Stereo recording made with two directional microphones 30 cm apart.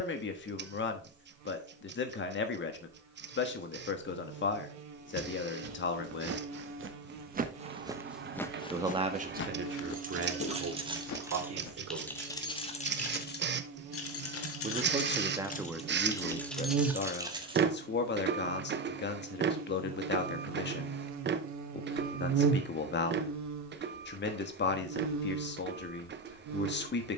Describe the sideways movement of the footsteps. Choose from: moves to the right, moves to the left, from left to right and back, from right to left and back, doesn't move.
moves to the left.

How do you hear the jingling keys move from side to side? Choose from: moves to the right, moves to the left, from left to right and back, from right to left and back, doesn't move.
from right to left and back.